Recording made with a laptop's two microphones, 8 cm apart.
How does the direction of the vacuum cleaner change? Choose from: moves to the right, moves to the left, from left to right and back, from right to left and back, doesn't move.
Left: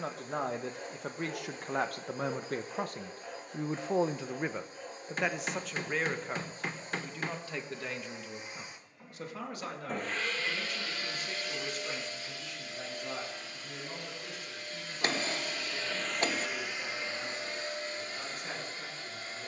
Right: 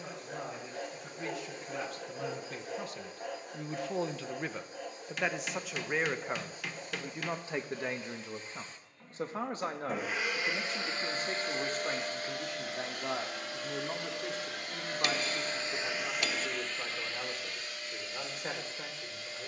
from left to right and back.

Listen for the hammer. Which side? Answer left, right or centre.
left.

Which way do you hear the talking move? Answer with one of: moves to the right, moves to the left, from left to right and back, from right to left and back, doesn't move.
moves to the right.